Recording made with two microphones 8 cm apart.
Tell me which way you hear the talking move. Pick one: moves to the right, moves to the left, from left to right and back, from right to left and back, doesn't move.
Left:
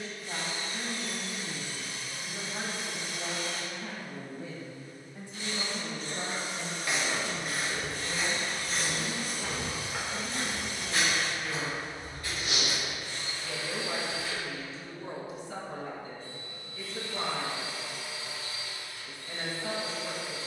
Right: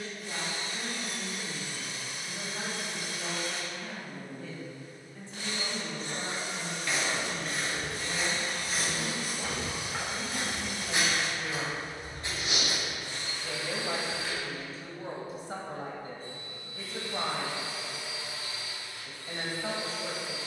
moves to the right.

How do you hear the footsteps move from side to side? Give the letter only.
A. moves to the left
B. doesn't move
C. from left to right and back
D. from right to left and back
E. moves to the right
E.